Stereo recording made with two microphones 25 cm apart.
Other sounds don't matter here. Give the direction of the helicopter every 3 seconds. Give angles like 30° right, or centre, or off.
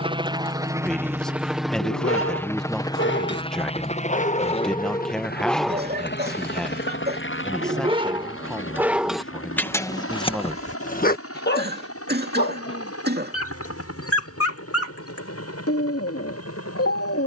centre, 30° left, 50° left, 60° left, 70° left, 70° left.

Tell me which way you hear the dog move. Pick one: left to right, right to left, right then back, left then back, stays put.
right then back.